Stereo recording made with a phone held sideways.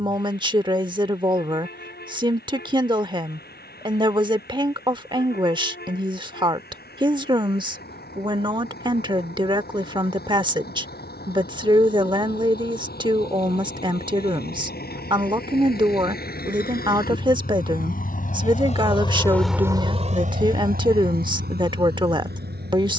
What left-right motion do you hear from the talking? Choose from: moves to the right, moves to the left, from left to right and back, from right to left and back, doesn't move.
doesn't move.